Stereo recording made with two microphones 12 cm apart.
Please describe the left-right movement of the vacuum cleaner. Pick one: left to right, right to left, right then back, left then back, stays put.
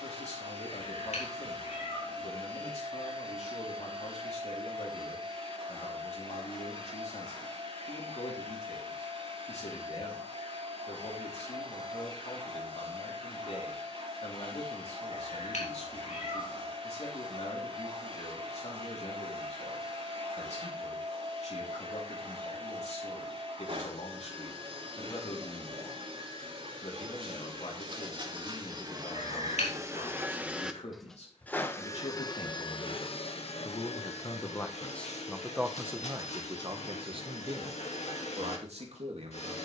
right to left.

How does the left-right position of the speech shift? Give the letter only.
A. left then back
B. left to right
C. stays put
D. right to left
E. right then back
B.